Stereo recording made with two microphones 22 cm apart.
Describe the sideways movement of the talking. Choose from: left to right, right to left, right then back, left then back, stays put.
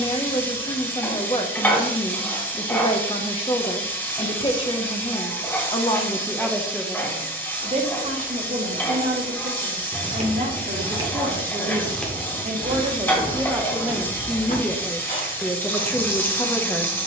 right then back.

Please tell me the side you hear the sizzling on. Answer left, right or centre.
centre.